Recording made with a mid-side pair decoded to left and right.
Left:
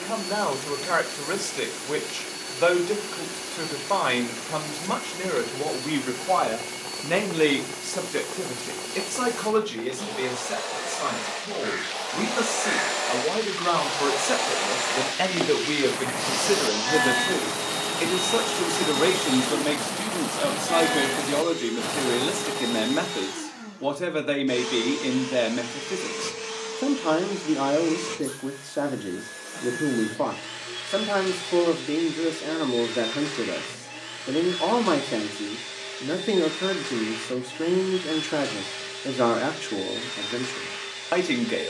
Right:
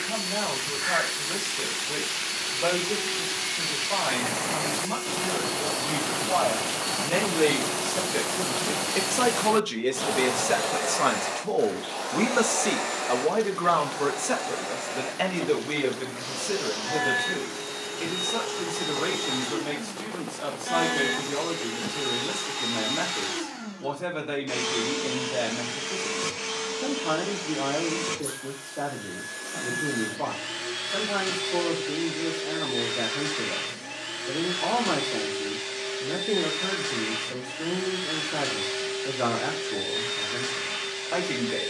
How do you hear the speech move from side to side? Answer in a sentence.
You can hear the speech move from left to right and back again.